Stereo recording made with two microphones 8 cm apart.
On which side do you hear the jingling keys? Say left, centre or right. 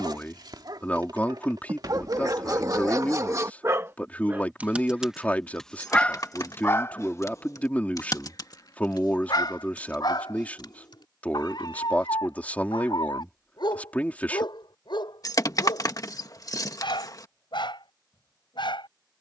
left.